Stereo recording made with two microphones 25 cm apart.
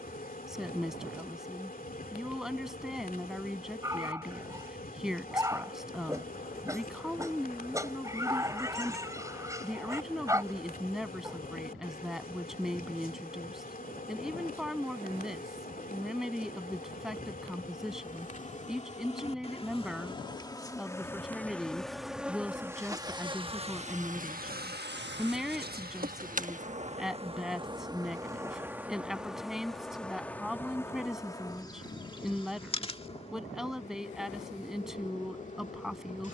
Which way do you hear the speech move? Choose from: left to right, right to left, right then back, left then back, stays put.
stays put.